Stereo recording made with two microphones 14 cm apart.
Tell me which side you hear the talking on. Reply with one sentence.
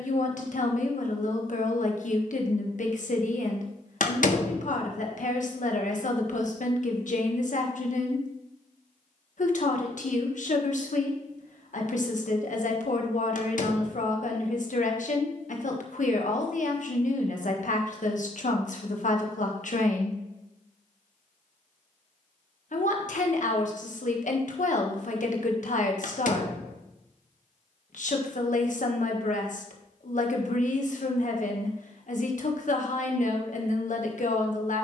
In this clip you hear the talking on the left.